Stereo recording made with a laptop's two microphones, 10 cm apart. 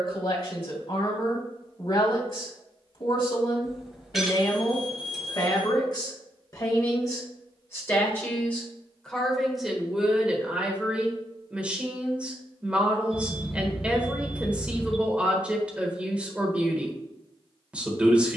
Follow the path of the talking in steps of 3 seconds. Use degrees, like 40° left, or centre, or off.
60° left, 50° left, 30° left, 10° right, 10° right, 10° right.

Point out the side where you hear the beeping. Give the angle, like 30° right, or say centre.
centre.